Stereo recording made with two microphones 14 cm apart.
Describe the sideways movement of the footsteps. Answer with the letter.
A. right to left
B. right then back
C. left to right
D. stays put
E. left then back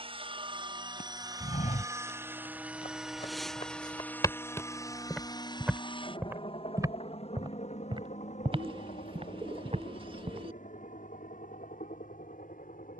C.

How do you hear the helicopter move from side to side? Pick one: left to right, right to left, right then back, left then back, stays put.
right to left.